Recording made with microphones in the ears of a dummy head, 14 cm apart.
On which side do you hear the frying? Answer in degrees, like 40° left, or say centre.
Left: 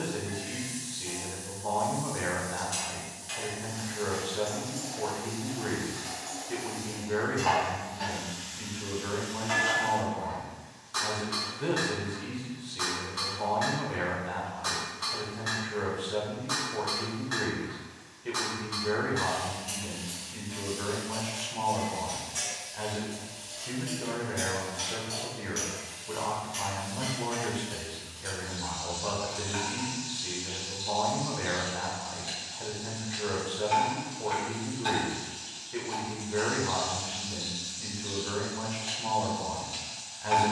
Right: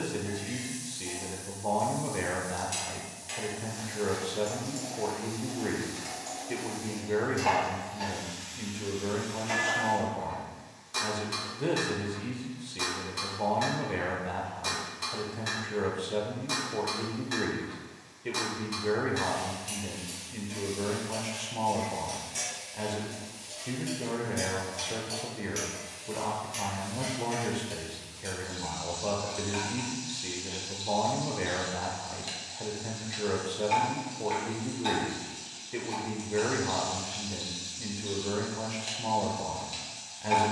20° right.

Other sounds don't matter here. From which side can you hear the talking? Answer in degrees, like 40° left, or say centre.
20° right.